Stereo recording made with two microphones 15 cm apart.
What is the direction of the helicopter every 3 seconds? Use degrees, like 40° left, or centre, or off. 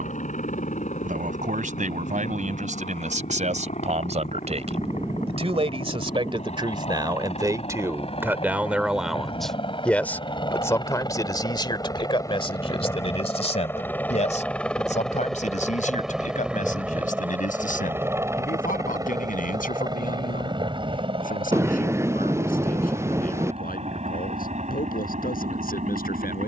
60° left, 60° left, 50° left, 30° left, 20° left, 10° right, 20° right, 40° right, 50° right.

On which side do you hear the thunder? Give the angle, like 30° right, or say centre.
20° right.